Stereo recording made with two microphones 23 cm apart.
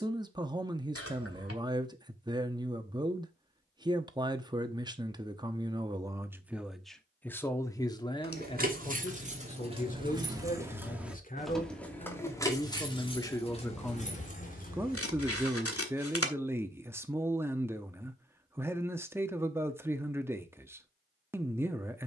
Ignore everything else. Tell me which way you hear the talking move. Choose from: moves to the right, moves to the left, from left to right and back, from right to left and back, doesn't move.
from right to left and back.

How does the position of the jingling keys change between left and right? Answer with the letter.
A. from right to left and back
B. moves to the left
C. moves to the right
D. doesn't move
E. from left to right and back
B.